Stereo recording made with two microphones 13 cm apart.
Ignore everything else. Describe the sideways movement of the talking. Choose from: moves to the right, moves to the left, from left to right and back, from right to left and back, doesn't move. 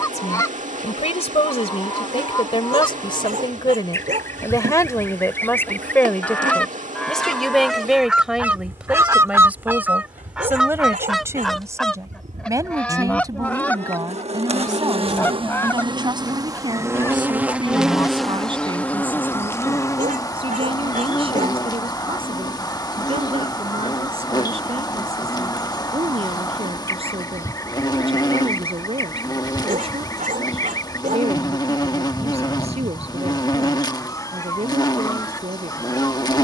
moves to the right.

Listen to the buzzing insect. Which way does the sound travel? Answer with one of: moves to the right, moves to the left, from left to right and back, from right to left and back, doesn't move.
moves to the left.